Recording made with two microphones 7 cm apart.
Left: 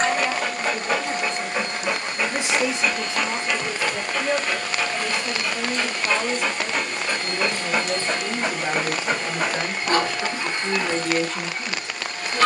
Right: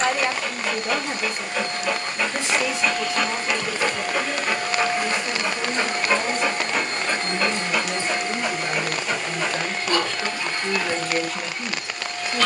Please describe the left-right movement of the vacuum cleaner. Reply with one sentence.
In this clip you hear the vacuum cleaner go right and come back.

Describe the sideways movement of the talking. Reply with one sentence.
In this clip you hear the talking go left and come back.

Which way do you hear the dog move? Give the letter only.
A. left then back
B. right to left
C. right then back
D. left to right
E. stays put
C.